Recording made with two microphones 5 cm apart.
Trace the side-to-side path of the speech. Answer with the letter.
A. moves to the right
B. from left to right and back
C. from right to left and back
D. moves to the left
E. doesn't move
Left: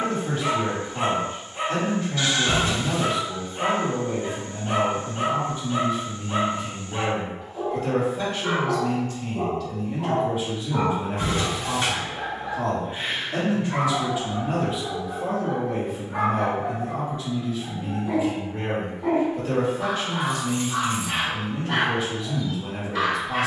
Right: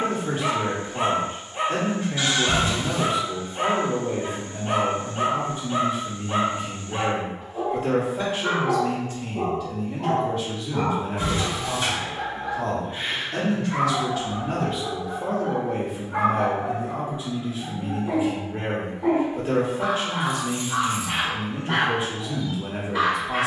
C.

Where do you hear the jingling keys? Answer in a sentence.
You can hear the jingling keys on the left.